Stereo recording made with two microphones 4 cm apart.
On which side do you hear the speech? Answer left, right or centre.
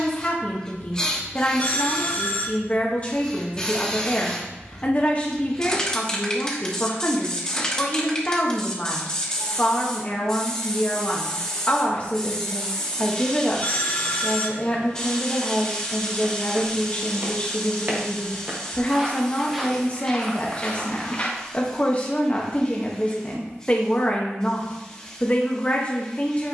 left.